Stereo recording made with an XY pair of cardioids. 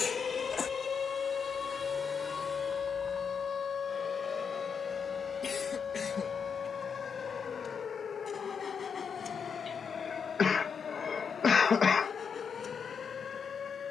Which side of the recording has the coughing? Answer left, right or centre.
left.